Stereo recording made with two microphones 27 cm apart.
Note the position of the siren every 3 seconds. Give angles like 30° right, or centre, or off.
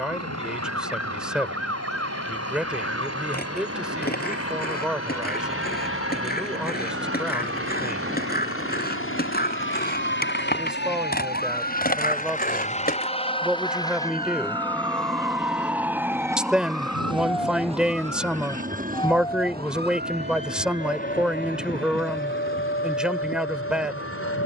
60° right, 50° right, 50° right, 40° right, 20° right, centre, 20° left, 40° left.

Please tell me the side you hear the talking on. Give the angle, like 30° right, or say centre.
centre.